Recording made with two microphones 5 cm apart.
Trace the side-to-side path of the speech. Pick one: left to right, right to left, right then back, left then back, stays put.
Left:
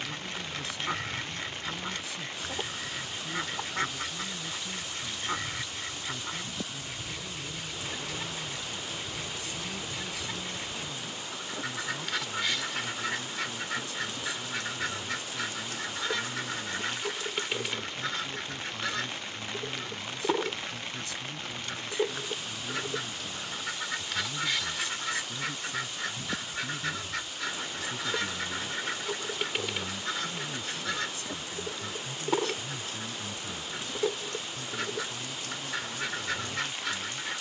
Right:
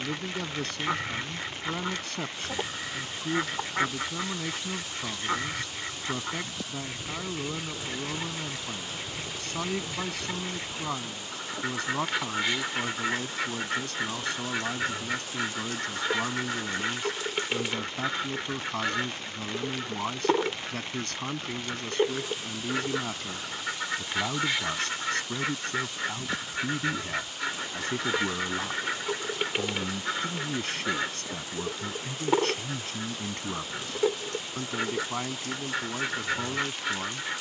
stays put.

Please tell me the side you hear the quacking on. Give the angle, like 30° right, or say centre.
20° right.